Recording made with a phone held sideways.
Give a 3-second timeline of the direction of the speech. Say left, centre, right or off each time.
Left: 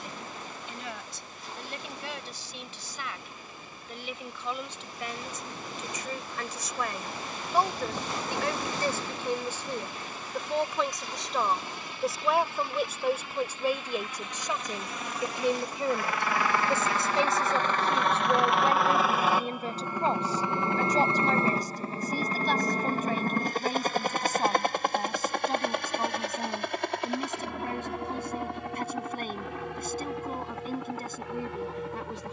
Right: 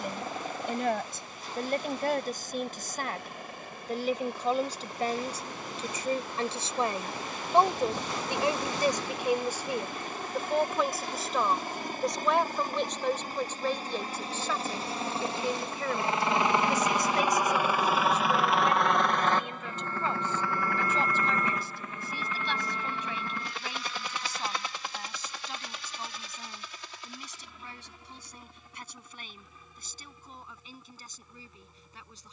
right, right, right, centre, centre, left, left, left, left, left, left.